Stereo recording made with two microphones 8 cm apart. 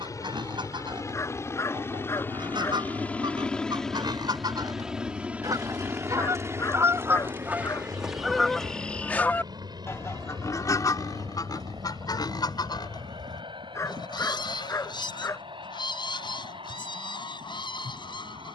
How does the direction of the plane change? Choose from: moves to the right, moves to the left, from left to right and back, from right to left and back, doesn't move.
moves to the right.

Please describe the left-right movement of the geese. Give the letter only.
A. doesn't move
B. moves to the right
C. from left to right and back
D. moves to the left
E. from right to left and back
D.